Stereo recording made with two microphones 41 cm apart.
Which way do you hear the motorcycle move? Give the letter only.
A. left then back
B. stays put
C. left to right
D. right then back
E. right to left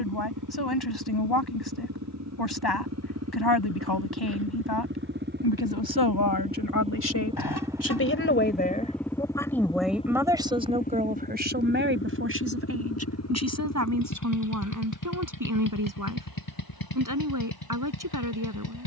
E.